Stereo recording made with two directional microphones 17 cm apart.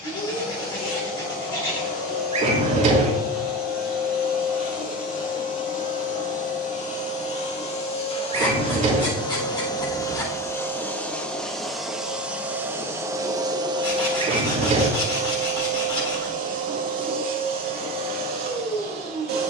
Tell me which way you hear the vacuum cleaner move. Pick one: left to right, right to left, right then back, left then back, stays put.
left to right.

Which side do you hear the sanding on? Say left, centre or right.
left.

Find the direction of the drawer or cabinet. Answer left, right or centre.
right.